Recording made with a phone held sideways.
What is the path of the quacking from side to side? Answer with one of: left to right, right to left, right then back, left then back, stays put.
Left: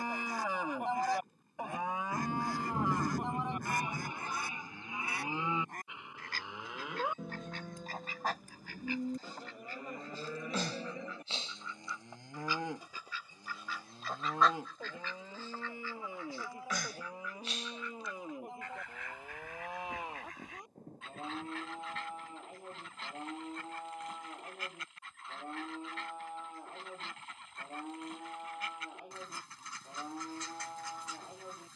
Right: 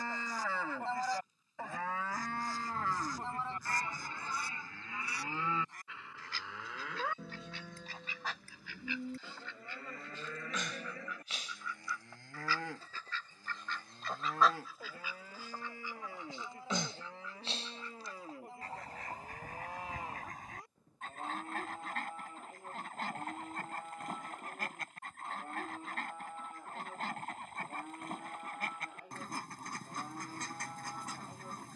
left to right.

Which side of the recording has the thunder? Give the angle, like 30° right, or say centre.
60° left.